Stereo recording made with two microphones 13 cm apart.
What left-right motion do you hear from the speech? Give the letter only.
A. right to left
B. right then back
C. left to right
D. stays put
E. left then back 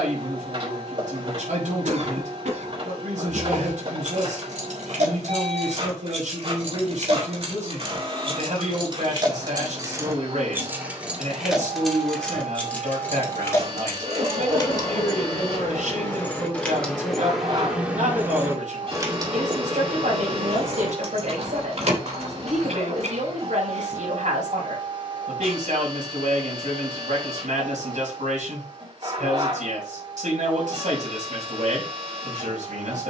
D.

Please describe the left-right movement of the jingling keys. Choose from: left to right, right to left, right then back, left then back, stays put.
left then back.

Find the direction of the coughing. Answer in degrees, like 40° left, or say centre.
70° right.